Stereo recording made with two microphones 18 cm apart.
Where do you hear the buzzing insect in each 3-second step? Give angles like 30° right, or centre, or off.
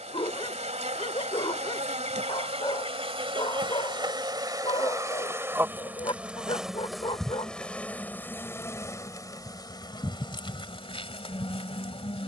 40° right, 20° right, centre, 30° left.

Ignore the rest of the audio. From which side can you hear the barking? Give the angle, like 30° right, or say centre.
30° left.